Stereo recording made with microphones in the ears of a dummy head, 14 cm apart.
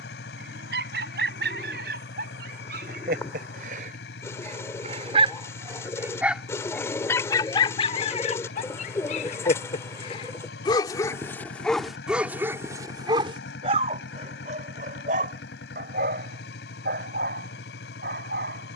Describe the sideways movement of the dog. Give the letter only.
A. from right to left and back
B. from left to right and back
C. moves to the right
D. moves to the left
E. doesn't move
A.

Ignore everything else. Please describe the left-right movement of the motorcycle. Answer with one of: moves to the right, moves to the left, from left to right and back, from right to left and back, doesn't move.
doesn't move.